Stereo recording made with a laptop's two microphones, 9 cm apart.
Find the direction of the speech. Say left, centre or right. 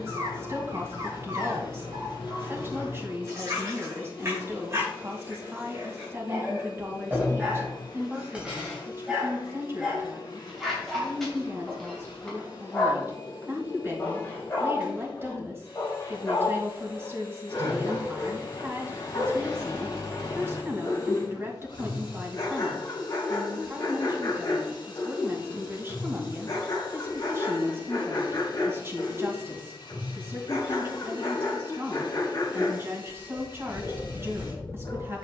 right.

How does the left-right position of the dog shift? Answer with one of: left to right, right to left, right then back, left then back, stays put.
right to left.